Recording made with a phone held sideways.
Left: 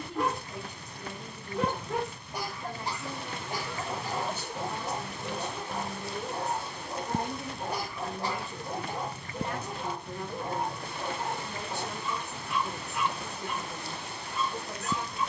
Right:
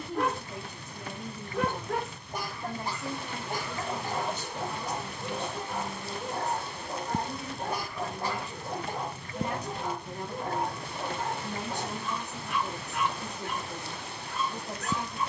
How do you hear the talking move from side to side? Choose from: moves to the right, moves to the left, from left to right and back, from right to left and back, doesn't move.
from right to left and back.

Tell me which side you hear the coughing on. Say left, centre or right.
right.